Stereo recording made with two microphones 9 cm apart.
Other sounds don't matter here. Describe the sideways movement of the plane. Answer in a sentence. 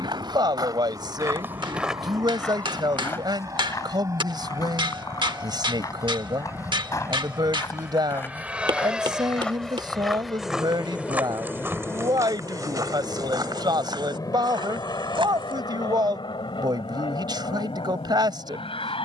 In this clip you hear the plane travel towards the left.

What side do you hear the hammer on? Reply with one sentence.
You can hear the hammer on the right.